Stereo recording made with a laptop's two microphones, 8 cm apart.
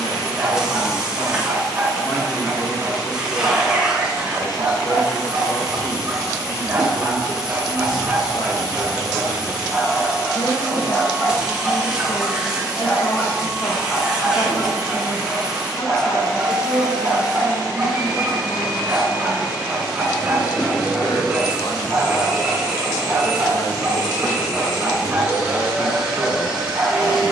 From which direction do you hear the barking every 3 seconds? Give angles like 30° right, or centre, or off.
30° right, 30° right, 20° right, 10° left, 20° left, 10° right, 20° right, 20° right, 20° right.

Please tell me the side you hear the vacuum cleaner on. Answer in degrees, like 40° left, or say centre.
10° right.